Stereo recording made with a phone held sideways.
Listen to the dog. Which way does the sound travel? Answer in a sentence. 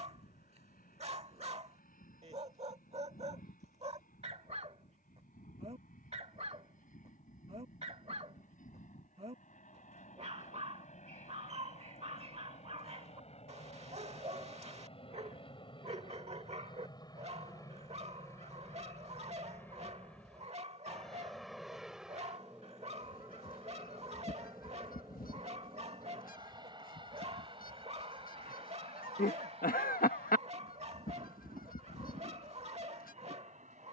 You can hear the dog stay in one place.